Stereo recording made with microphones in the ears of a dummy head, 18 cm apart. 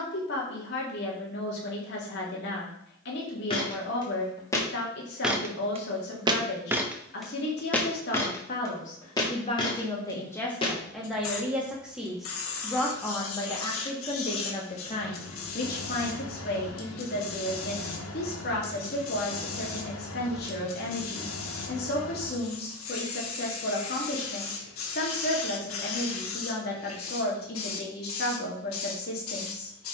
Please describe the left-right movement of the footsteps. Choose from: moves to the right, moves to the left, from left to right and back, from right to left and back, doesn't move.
from left to right and back.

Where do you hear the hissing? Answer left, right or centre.
left.